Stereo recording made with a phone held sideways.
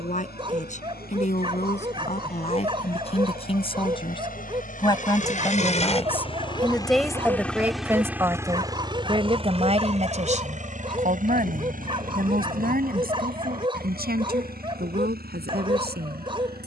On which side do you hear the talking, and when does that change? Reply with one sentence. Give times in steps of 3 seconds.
You can hear the talking on the left from 0 s, in the centre from 6 s and on the right from 9 s.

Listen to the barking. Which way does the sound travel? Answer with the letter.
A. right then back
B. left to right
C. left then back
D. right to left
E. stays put
E.